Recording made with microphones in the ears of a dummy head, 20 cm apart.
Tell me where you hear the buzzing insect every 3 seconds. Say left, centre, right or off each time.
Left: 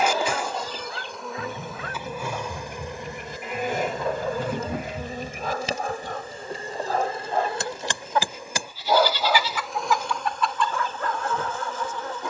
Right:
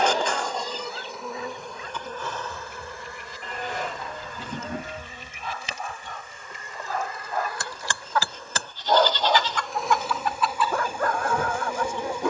centre, left, left, centre.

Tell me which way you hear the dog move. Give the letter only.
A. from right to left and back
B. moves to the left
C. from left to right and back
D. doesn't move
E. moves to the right
E.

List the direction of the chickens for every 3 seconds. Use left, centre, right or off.
left, left, left, centre.